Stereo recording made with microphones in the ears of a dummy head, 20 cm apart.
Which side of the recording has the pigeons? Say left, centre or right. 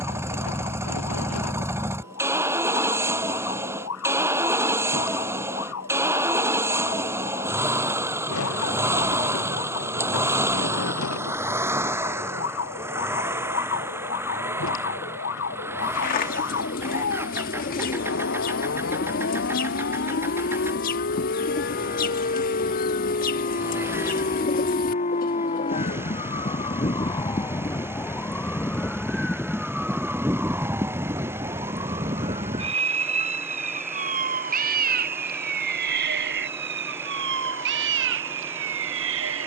left.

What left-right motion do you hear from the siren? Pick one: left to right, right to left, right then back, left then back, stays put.
left to right.